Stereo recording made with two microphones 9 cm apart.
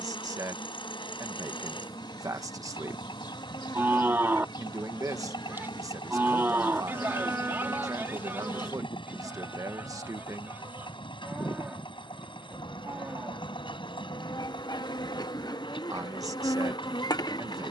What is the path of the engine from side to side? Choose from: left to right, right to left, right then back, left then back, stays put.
stays put.